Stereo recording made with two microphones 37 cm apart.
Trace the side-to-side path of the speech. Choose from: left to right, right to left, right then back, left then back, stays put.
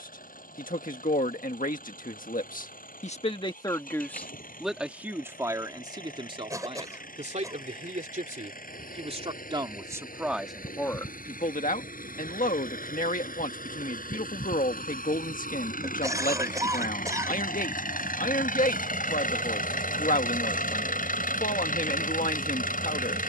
right then back.